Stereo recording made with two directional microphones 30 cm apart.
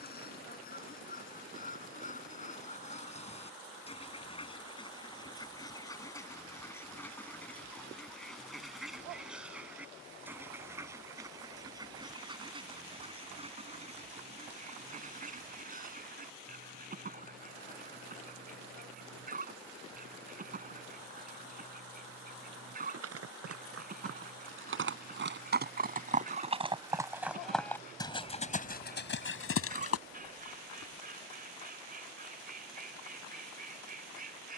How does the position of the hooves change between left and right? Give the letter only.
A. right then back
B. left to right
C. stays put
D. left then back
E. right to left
E.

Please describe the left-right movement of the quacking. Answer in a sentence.
In this clip you hear the quacking go from the left side to the right.